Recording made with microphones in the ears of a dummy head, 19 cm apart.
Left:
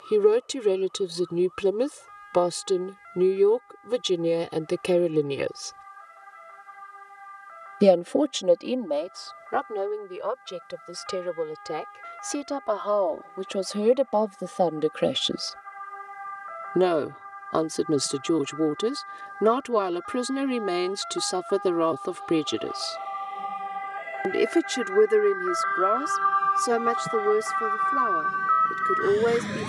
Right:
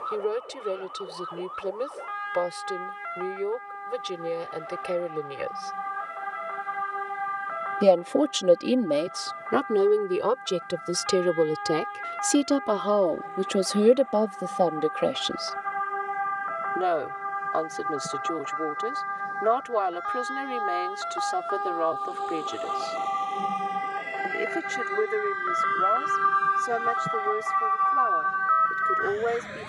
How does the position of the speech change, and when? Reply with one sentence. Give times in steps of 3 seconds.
You can hear the speech on the left from 0 s, in the centre from 6 s, on the right from 9 s and on the left from 15 s.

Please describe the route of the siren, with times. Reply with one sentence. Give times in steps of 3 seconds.
You can hear the siren on the right from 0 s and on the left from 27 s.